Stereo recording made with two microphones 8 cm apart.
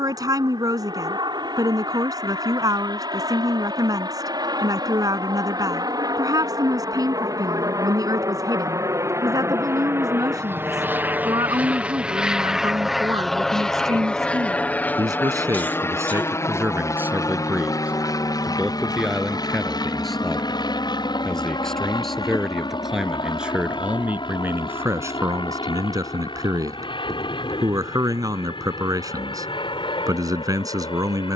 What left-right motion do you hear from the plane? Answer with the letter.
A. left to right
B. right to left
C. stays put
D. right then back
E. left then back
B.